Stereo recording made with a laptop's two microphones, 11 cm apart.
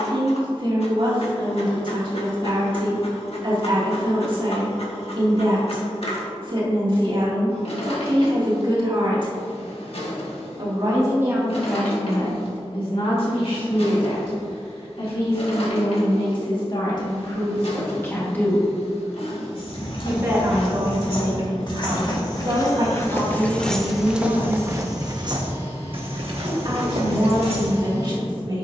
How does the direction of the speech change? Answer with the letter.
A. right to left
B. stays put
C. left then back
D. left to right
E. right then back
C.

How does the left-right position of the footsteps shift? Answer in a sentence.
In this clip you hear the footsteps travel towards the right.